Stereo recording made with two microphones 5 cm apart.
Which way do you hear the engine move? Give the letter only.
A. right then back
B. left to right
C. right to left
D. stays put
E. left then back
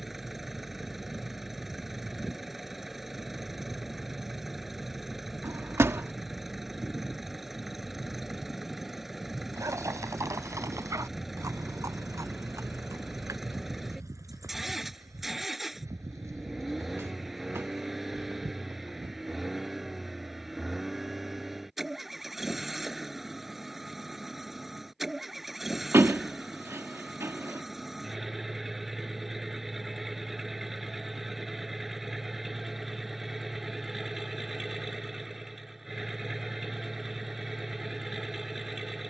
D.